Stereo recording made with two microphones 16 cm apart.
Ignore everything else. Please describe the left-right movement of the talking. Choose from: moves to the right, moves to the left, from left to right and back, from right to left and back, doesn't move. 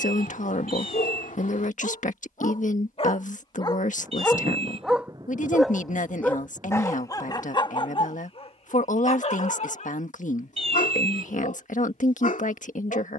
doesn't move.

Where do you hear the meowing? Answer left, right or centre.
right.